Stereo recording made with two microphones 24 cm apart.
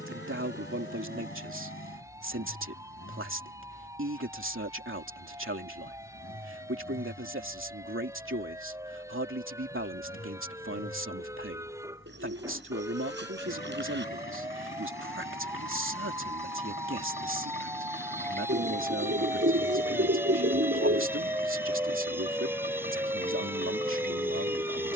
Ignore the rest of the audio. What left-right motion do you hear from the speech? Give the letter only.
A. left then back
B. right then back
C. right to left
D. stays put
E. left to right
D.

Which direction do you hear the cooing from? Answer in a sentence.
You can hear the cooing on the right.